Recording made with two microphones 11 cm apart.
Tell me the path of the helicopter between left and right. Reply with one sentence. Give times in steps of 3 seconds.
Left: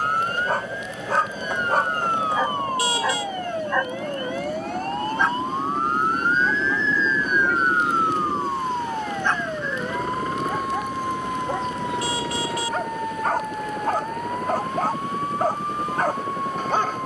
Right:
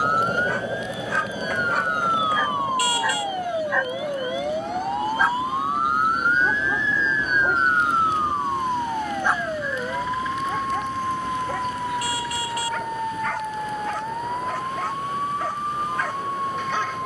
In this clip you hear the helicopter in the centre from 0 s and on the left from 3 s.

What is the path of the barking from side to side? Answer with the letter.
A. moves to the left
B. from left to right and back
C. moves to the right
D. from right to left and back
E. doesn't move
B.